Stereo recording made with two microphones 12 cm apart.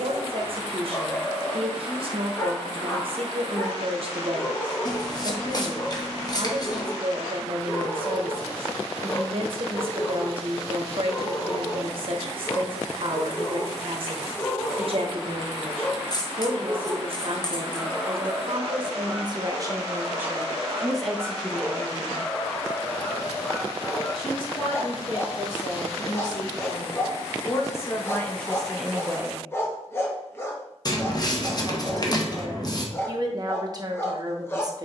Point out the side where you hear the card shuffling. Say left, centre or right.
left.